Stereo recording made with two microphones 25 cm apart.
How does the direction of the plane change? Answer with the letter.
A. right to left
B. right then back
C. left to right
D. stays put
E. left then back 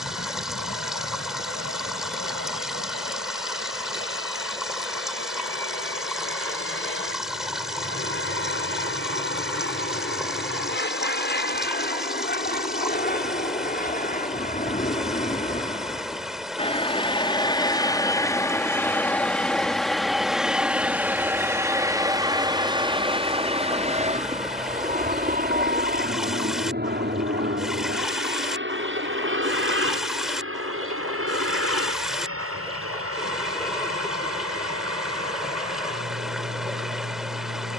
C.